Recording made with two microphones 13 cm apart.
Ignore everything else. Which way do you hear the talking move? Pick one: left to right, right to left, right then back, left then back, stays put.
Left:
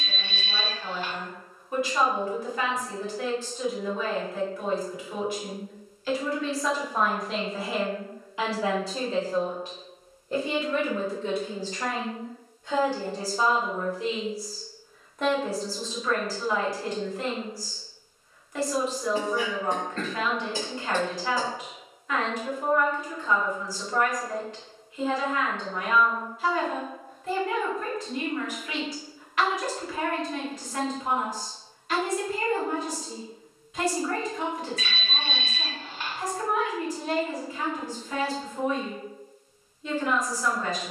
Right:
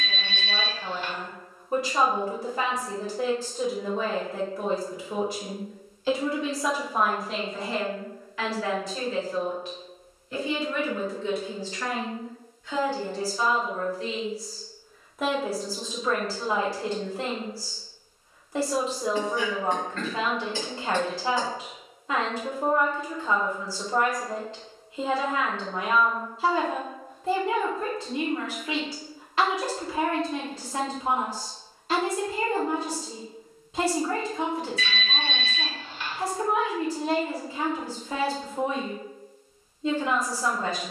left then back.